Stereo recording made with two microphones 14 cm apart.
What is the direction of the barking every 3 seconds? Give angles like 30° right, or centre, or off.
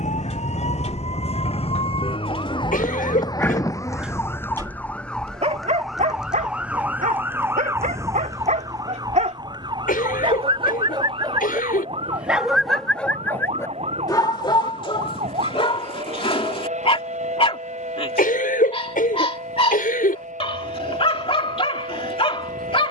50° left, 20° right, 60° right, 40° right, 20° left, 40° left, 40° left, 40° left.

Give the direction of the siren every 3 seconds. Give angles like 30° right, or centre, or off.
50° left, 20° left, 10° right, 30° right, 40° right, 50° right, 50° right, 60° right.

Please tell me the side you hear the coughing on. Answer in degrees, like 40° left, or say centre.
80° left.